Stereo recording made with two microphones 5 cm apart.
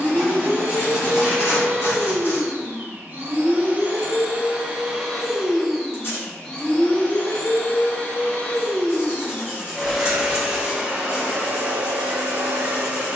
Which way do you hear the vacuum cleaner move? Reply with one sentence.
In this clip you hear the vacuum cleaner move from right to left and back again.